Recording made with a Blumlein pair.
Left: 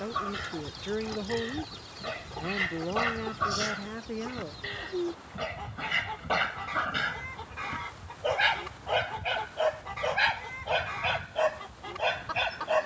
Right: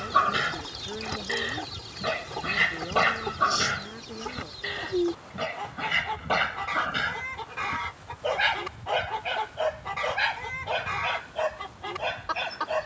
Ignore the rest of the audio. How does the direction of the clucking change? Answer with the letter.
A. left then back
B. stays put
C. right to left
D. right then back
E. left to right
B.